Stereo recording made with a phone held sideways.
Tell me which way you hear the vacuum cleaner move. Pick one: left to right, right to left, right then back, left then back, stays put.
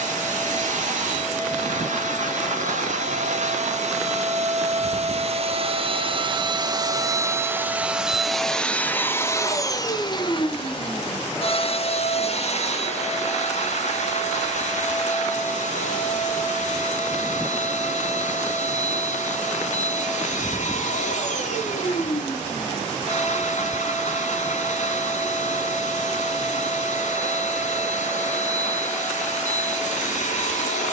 right to left.